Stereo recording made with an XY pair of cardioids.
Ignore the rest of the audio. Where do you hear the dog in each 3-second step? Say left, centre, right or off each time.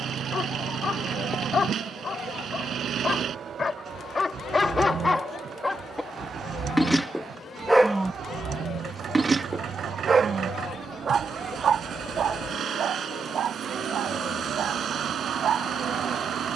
left, left, centre, right, right, right.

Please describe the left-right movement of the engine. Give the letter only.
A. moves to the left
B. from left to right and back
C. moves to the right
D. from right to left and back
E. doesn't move
E.